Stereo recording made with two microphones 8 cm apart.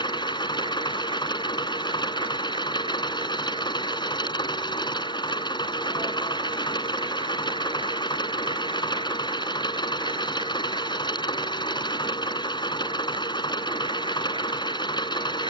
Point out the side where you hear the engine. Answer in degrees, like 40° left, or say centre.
60° left.